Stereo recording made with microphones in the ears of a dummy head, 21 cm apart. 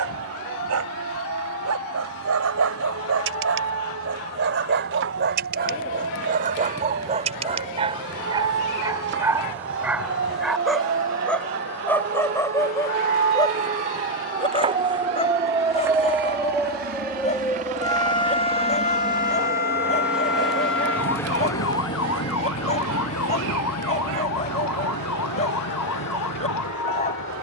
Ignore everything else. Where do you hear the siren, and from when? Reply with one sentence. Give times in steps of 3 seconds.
In this clip you hear the siren on the right from 0 s, in the centre from 15 s and on the left from 18 s.